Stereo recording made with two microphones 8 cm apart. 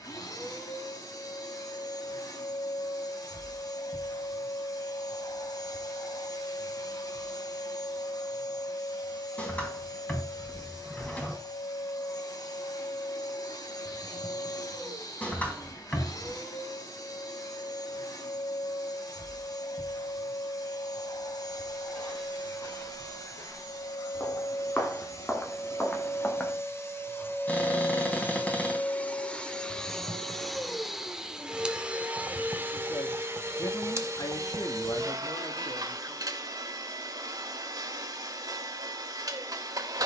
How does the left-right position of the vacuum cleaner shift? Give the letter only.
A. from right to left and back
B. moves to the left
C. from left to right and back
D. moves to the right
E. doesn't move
D.